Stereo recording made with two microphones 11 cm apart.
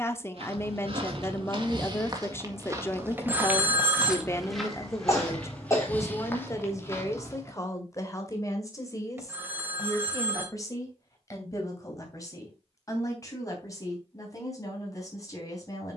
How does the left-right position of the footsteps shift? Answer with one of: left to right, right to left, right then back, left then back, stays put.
right to left.